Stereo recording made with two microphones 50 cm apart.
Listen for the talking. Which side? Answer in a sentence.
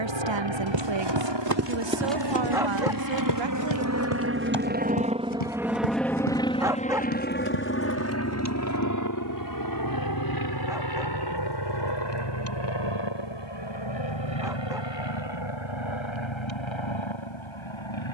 In this clip you hear the talking on the right.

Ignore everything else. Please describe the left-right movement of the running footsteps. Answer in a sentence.
You can hear the running footsteps move to the left.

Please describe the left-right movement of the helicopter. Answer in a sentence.
You can hear the helicopter move to the left.